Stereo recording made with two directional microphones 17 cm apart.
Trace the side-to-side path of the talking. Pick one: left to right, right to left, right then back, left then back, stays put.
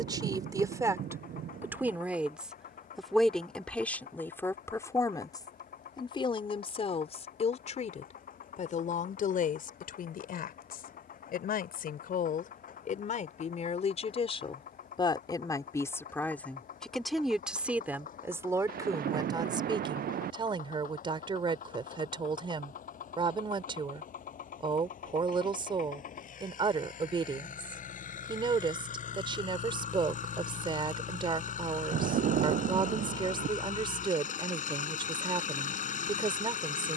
left then back.